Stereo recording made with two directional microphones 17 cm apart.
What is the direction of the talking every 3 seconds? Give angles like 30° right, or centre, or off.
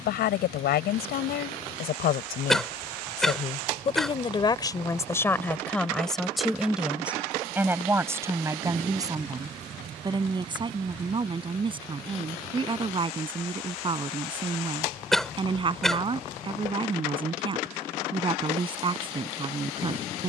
70° left, 20° left, 10° right, 30° right, 30° right, 30° right, 30° right.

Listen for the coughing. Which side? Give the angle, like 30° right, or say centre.
centre.